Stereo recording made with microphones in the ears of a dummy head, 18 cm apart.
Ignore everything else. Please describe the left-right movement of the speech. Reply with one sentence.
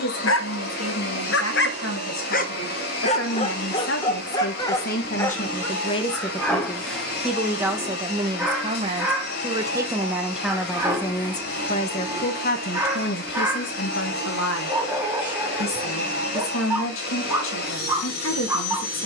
In this clip you hear the speech go right and come back.